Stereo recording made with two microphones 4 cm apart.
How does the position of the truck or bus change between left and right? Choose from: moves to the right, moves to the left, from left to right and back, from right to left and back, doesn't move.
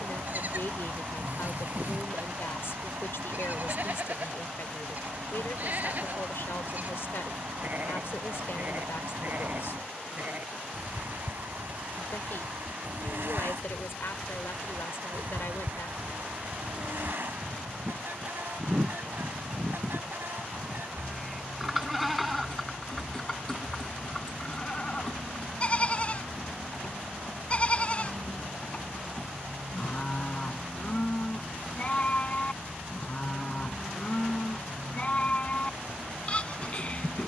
doesn't move.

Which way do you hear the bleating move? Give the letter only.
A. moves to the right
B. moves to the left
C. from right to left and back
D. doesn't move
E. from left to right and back
B.